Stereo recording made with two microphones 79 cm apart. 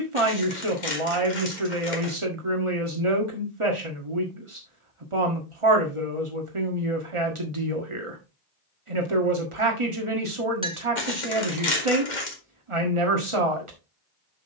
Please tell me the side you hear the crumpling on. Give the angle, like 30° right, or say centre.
70° left.